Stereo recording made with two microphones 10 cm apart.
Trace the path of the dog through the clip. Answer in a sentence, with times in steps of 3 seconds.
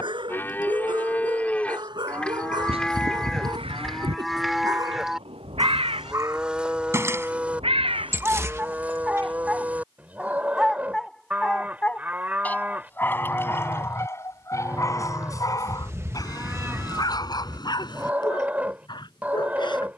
You can hear the dog on the right from 0 s, in the centre from 9 s and on the left from 12 s.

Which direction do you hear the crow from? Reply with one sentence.
In this clip you hear the crow on the right.